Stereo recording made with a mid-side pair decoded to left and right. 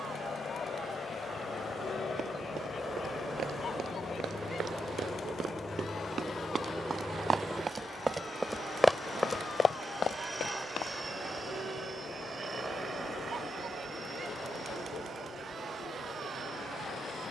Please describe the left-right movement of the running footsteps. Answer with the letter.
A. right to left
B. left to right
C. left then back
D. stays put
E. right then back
A.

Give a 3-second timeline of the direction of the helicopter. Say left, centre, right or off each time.
left, left, centre, right, right, right.